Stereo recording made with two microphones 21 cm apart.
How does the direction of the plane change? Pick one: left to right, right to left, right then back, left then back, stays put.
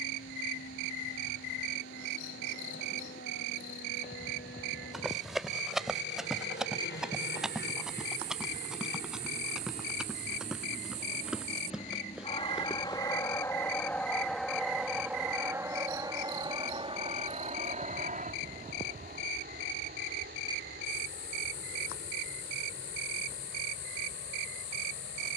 left to right.